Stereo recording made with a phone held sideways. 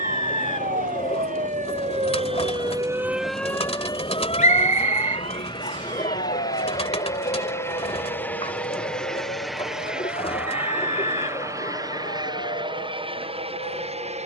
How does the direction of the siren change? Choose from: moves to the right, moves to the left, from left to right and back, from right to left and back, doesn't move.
moves to the left.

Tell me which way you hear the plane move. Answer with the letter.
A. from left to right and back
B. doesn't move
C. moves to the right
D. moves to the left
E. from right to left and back
C.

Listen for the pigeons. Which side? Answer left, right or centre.
left.